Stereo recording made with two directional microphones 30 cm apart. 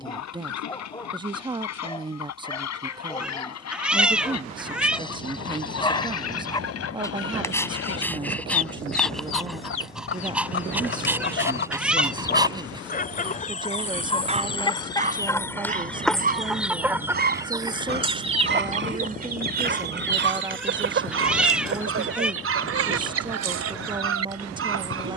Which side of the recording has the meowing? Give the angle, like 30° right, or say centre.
centre.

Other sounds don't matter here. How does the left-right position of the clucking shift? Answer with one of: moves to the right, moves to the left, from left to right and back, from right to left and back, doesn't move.
moves to the right.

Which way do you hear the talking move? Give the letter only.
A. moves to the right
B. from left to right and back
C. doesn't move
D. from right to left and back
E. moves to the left
C.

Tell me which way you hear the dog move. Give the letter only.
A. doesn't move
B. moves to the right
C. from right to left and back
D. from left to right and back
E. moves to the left
B.